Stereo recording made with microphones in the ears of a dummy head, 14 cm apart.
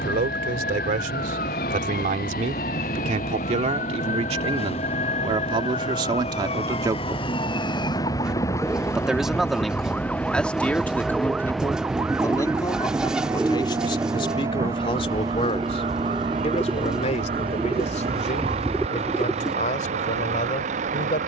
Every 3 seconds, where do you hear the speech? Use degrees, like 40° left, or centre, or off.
50° right, 40° right, 20° right, 10° left, 30° left, 40° left, 50° left.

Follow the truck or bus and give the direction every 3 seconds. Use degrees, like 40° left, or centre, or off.
50° left, 40° left, 30° left, 10° left, 10° right, 30° right, 40° right.